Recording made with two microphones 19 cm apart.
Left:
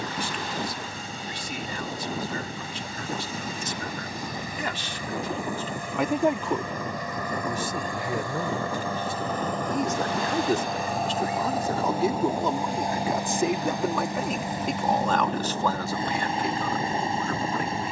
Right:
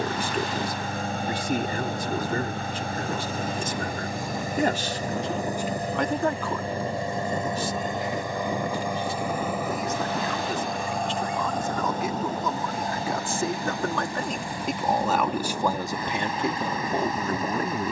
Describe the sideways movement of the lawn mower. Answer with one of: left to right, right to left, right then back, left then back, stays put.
right to left.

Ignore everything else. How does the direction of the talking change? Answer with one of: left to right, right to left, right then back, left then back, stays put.
left then back.